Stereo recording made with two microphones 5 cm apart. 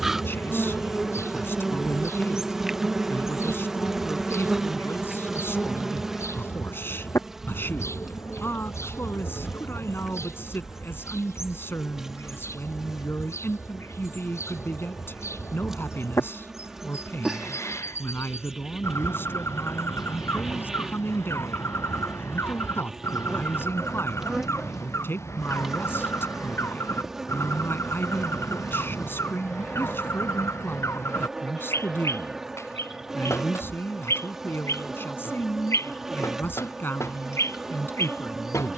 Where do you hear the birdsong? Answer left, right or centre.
left.